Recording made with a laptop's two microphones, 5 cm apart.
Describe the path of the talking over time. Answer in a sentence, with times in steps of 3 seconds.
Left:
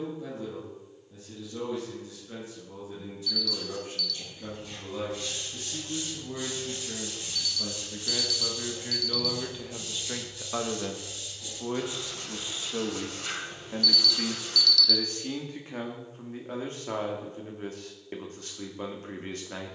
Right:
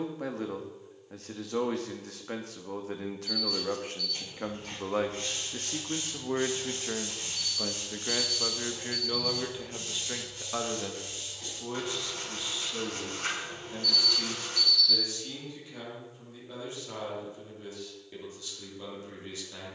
In this clip you hear the talking on the right from 0 s, in the centre from 9 s and on the left from 12 s.